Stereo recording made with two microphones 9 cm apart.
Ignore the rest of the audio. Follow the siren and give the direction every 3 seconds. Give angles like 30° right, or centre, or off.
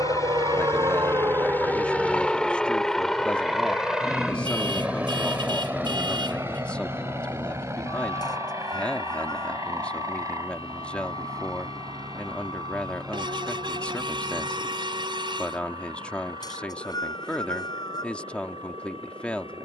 20° right, 30° left, 50° left, 60° left, 60° left, 70° left, 70° left.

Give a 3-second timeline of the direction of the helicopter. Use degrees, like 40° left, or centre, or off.
20° left, 10° right, 30° right, 40° right, 40° right, 50° right, 50° right.